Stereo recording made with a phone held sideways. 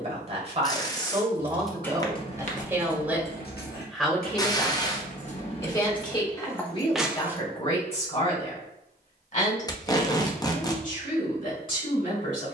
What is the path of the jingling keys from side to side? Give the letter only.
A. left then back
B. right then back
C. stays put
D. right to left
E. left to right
A.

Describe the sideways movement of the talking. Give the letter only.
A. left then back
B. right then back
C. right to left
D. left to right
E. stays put
C.